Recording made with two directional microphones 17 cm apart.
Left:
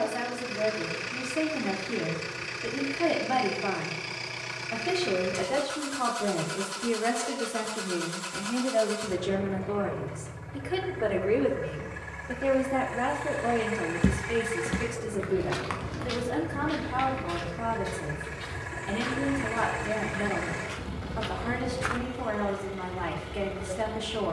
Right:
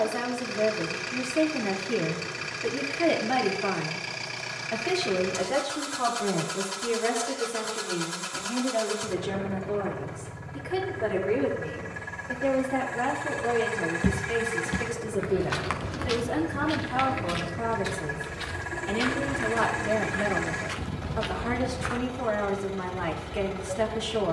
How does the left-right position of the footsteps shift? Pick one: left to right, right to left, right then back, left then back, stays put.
right then back.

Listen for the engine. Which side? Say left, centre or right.
right.